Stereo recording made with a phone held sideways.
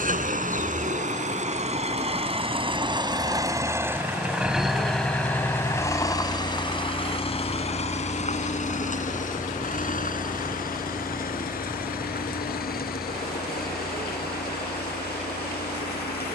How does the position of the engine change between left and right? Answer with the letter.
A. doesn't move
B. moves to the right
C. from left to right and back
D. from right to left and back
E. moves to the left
E.